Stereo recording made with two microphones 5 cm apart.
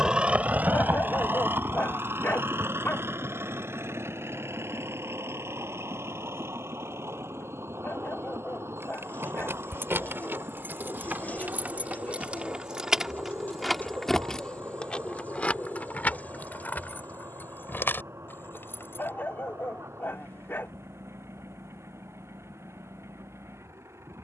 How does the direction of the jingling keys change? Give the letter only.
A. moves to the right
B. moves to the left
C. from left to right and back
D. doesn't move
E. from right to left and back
B.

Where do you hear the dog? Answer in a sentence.
You can hear the dog on the left.